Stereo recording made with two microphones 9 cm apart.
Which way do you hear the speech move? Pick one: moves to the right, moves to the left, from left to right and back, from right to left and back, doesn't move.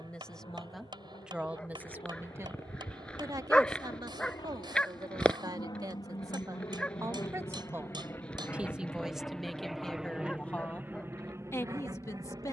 from left to right and back.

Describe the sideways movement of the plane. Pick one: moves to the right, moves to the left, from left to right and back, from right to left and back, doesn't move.
moves to the right.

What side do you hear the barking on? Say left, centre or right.
centre.